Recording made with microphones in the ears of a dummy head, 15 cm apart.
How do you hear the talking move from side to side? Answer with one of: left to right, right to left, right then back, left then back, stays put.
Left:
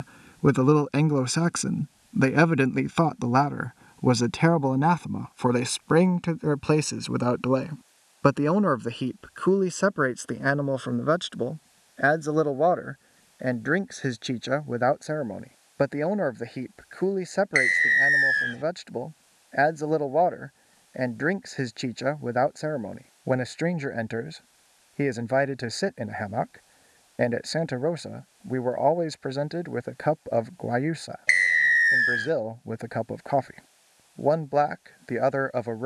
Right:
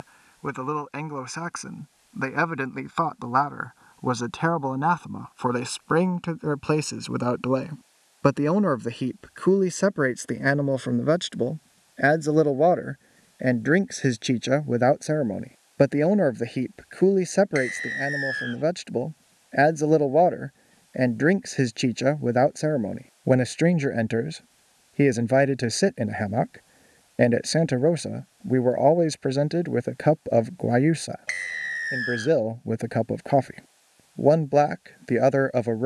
left to right.